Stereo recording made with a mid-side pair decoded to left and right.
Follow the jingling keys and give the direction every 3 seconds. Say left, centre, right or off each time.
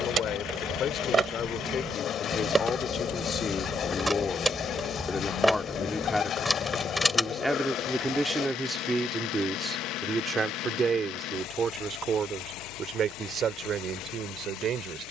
right, centre, centre, off, off.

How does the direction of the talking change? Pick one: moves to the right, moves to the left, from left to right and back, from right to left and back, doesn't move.
moves to the right.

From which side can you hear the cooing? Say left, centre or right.
left.